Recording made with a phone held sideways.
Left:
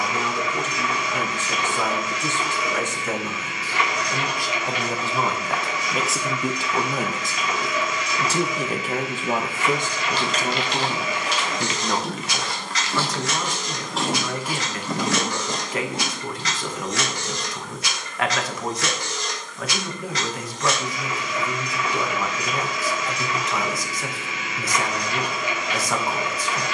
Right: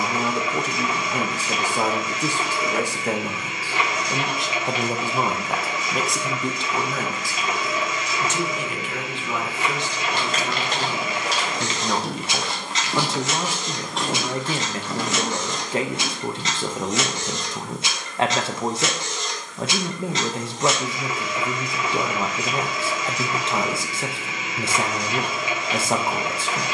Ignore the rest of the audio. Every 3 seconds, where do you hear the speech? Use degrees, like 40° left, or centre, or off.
40° right, 20° right, 20° left, 40° left, 30° right, 30° right, 30° right, 30° right, 30° right.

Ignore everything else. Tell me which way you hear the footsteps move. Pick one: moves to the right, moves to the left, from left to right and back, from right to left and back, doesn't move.
moves to the left.